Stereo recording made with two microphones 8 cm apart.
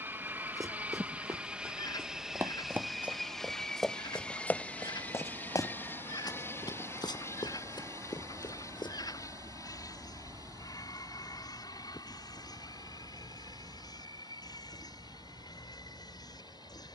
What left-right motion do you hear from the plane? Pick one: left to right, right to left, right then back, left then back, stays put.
right to left.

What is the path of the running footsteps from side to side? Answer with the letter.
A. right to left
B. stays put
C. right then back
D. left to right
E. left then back
A.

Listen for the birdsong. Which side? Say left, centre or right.
left.